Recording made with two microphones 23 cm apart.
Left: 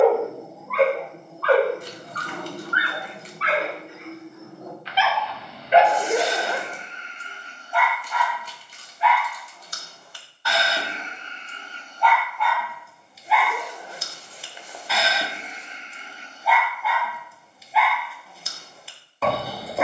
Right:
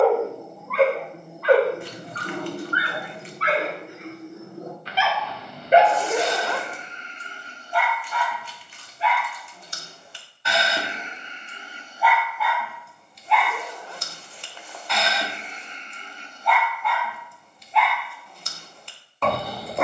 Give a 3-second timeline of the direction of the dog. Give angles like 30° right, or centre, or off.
10° right, 40° right, 40° right, 20° right, centre, centre, centre.